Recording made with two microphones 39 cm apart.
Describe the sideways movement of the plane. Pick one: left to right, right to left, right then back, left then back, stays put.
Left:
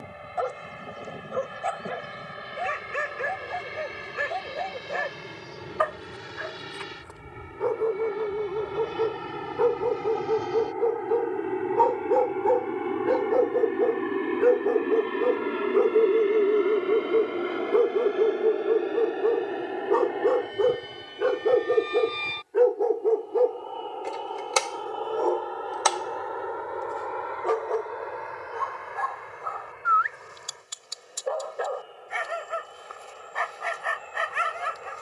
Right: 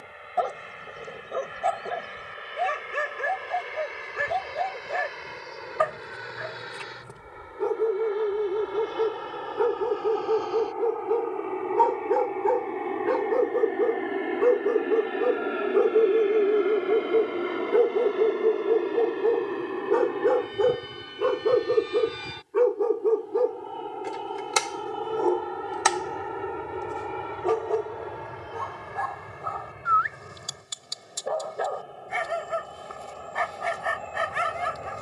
left to right.